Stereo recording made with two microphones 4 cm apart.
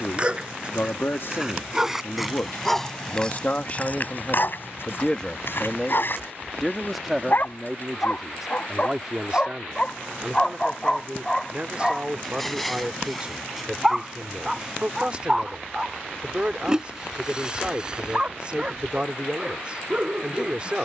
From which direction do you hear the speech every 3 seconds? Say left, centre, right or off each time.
left, left, centre, right, right, right, right.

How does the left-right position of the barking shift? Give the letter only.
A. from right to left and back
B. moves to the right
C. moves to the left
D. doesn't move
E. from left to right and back
A.